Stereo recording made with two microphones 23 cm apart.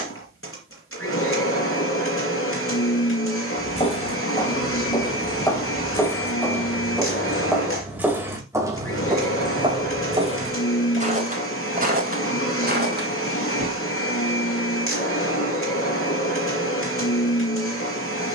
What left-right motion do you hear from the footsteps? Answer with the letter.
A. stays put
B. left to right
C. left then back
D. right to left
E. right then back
B.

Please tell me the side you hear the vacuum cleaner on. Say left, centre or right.
left.